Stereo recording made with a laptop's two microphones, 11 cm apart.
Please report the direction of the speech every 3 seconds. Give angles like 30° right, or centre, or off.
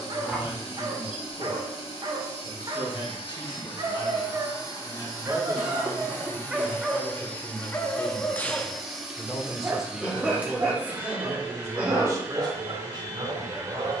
50° left, 40° left, 20° left, 10° right, 40° right.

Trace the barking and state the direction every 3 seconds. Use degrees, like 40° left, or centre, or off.
40° right, 30° right, 10° left, 30° right, 40° right.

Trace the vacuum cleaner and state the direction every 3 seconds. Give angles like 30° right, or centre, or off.
50° left, 40° left, 10° left, 10° right, 30° right.